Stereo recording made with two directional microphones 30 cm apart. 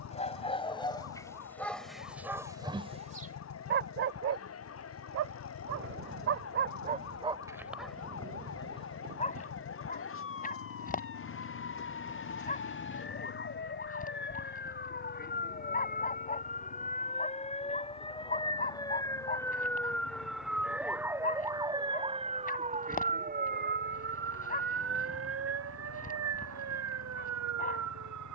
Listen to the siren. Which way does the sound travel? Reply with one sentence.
You can hear the siren travel towards the right.